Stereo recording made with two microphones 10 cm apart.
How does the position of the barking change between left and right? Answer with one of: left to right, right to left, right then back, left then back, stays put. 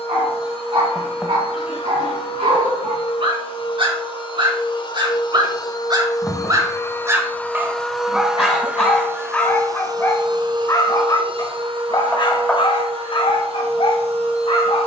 right to left.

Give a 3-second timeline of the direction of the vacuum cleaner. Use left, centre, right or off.
left, left, centre, right, right.